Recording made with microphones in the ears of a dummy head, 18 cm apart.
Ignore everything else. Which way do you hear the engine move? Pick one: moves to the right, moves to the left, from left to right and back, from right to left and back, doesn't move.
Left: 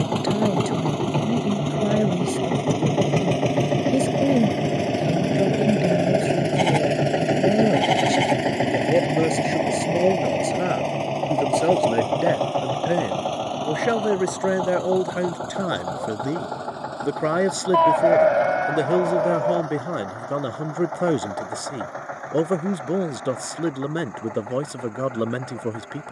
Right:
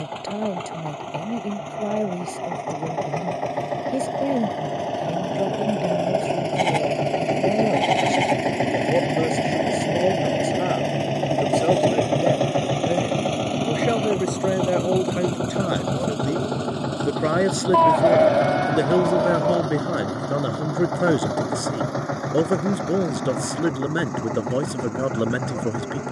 moves to the right.